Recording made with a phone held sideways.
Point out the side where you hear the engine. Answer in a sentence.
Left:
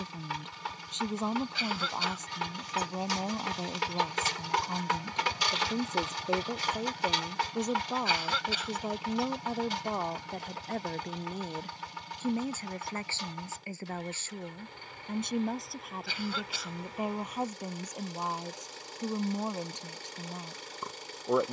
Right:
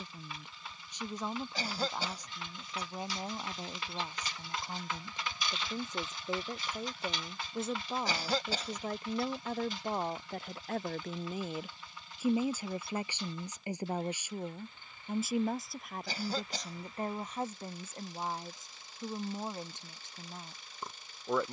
You can hear the engine on the left.